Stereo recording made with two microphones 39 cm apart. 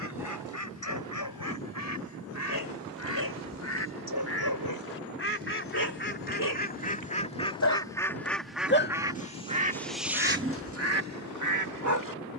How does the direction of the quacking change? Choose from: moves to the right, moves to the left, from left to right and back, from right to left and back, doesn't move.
moves to the right.